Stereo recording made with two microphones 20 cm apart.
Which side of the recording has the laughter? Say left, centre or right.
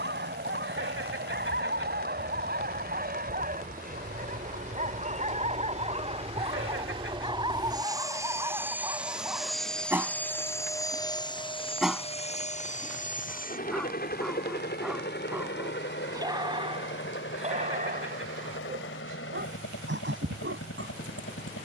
right.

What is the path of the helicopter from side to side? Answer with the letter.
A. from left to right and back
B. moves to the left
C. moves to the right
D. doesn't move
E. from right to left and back
B.